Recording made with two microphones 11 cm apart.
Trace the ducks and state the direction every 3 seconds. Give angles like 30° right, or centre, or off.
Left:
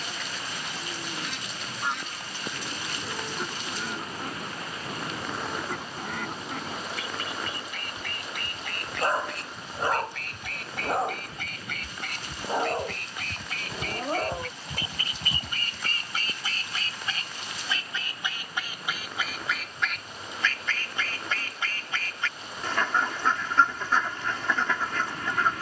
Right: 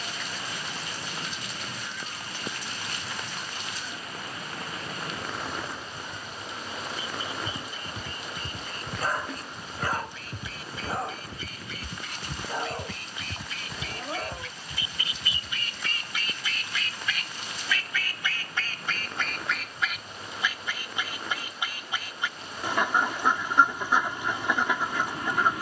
70° left, 70° left, 70° left, 70° left, 60° left, 40° left, centre, 10° right, 10° right.